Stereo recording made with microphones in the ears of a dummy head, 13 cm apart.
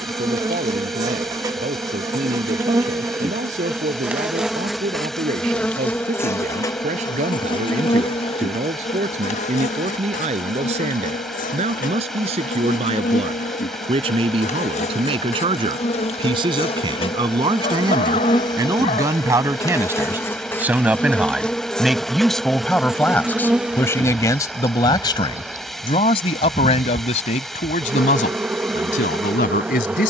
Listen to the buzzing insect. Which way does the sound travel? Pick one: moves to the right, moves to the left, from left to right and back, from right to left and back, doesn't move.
from right to left and back.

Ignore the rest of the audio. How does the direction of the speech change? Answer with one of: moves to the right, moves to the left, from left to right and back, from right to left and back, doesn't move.
moves to the left.